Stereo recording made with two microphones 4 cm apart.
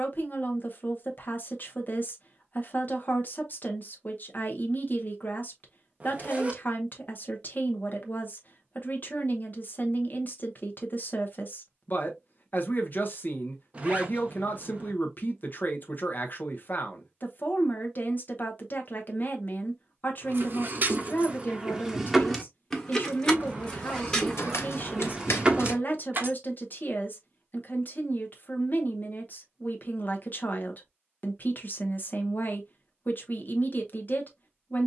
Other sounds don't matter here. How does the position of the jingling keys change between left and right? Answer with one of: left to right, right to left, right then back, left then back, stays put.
left then back.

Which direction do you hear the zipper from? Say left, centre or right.
right.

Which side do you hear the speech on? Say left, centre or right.
left.